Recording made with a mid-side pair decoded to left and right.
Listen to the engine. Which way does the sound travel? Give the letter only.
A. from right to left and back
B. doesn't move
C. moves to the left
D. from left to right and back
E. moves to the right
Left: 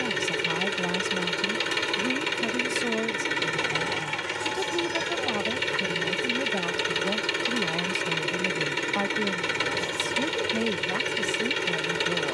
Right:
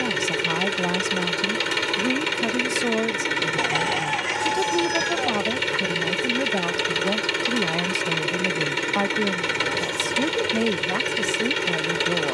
B.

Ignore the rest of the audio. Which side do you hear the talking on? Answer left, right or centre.
right.